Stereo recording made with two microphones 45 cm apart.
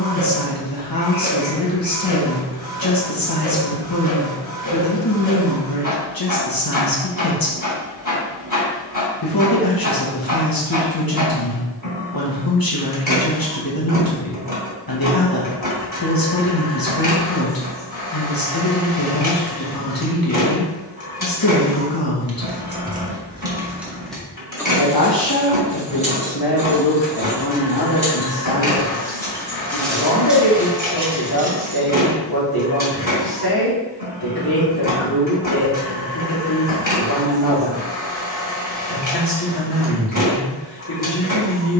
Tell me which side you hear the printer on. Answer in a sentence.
You can hear the printer on the left.